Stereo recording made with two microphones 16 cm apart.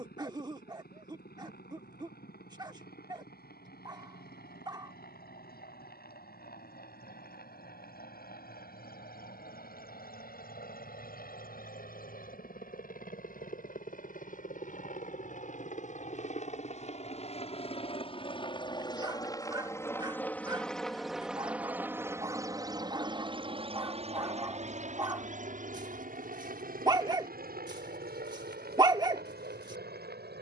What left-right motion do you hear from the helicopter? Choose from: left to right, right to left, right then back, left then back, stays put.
left to right.